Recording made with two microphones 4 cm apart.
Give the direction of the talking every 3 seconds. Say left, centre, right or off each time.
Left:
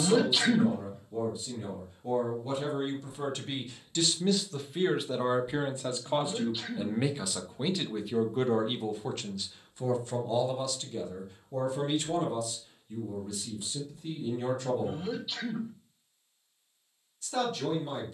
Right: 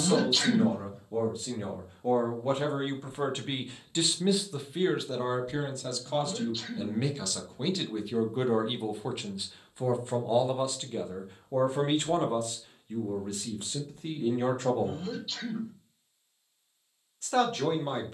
right, centre, centre, right, right, right.